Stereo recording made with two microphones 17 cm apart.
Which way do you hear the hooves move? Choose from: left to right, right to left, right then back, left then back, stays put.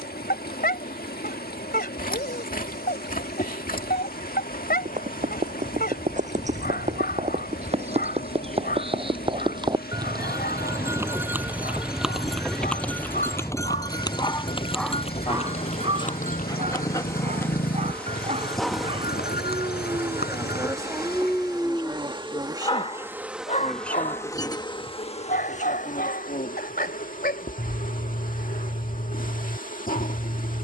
right to left.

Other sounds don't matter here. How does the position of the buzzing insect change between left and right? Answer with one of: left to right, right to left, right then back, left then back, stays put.
right then back.